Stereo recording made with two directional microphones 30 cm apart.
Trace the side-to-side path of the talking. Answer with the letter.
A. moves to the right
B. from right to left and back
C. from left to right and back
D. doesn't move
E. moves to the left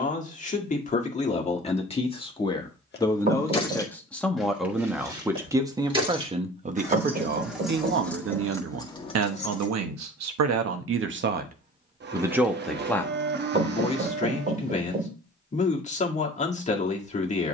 C.